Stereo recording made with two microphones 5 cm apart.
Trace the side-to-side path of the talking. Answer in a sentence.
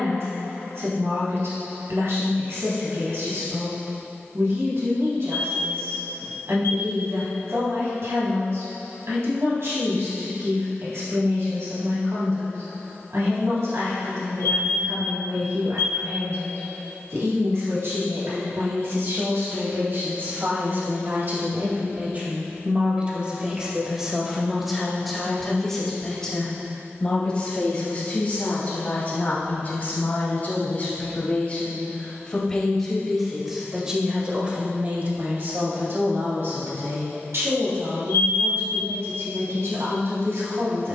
In this clip you hear the talking go left and come back.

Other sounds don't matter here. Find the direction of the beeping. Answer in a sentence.
In this clip you hear the beeping on the left.